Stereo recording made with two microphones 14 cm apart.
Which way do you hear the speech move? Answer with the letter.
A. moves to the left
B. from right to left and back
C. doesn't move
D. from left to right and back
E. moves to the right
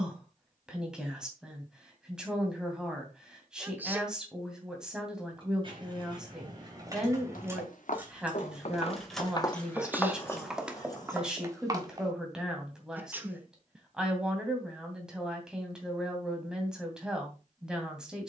C.